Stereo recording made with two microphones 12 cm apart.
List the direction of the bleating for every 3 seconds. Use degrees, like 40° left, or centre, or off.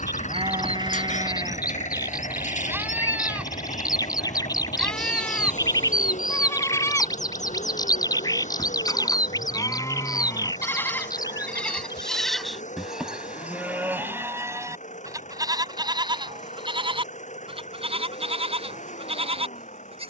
30° right, centre, 20° left, 20° left, 10° right, 40° right, 50° right.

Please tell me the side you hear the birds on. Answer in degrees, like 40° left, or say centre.
30° left.